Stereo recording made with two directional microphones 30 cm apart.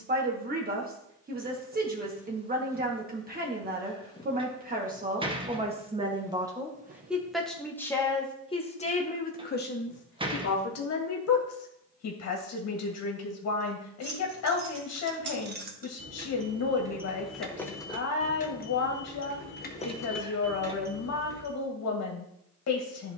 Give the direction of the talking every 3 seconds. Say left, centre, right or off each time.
right, right, centre, left, left, left, left, left.